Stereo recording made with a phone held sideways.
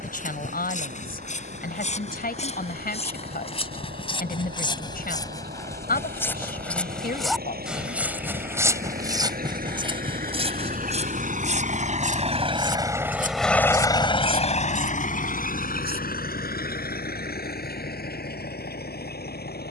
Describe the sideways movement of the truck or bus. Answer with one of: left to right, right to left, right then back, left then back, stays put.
right to left.